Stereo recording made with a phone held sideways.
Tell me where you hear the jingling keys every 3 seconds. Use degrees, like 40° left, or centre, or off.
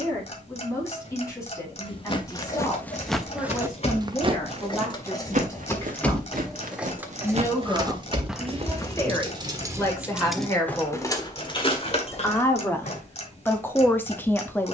50° left, 30° left, 20° right, centre, 50° left.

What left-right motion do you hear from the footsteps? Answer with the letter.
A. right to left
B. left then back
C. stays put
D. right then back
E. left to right
D.